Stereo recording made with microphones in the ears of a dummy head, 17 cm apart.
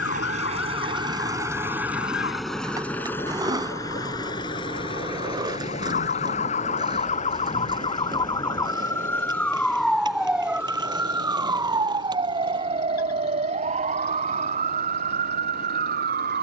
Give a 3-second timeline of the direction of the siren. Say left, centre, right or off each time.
left, left, left, centre, right, right.